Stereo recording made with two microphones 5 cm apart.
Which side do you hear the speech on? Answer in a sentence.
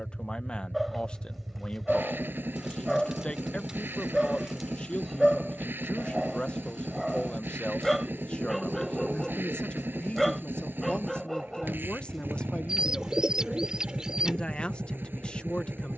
In this clip you hear the speech on the left.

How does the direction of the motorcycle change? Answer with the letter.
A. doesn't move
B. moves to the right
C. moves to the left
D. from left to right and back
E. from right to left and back
A.